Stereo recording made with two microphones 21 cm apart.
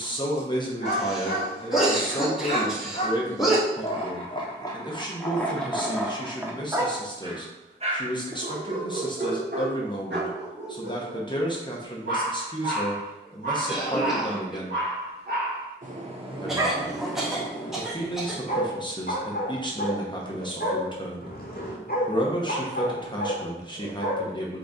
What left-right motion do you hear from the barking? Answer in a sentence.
You can hear the barking go right and come back.